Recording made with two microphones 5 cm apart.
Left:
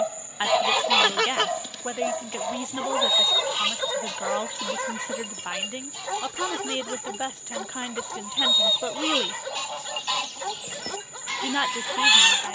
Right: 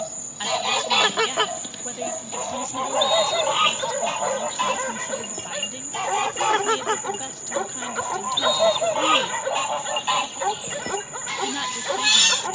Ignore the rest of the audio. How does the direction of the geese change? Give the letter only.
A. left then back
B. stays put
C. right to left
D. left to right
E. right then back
E.